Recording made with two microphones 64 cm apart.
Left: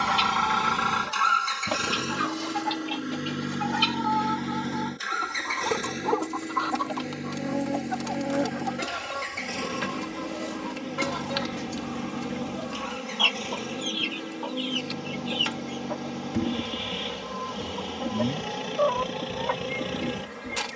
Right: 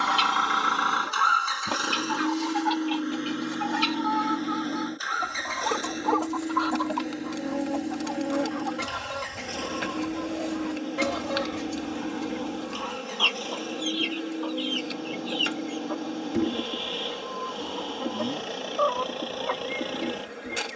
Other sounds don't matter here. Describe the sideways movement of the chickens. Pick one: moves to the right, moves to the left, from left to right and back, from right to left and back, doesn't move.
from left to right and back.